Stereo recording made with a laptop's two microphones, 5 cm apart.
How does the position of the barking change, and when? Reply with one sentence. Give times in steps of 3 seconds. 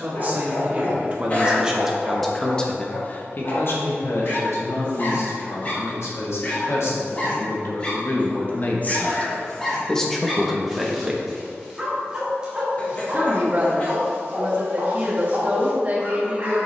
You can hear the barking on the left from 0 s, in the centre from 9 s and on the right from 12 s.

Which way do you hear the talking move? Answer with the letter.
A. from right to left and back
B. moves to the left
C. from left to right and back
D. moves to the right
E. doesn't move
A.